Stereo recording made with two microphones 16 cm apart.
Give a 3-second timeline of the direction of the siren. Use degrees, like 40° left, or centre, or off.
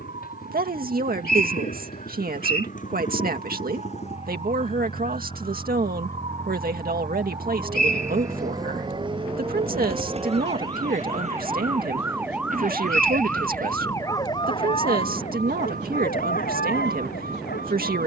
50° right, 50° right, 40° right, 30° right, 10° left, 60° left.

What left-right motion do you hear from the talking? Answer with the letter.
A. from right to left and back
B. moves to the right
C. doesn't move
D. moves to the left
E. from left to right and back
C.